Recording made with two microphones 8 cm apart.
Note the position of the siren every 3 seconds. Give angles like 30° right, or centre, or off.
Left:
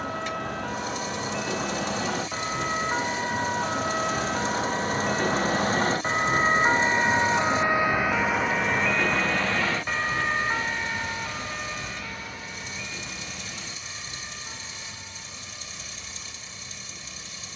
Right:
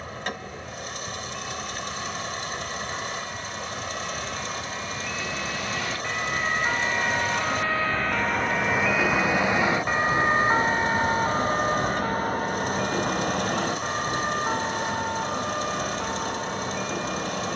70° left, 50° left, 20° left, 30° right, 50° right, 60° right.